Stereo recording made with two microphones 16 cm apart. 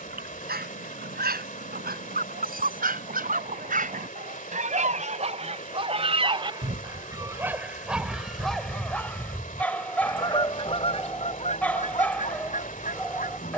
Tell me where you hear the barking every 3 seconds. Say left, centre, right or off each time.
right, right, centre, centre, centre.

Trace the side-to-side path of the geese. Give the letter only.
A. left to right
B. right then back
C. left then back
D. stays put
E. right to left
E.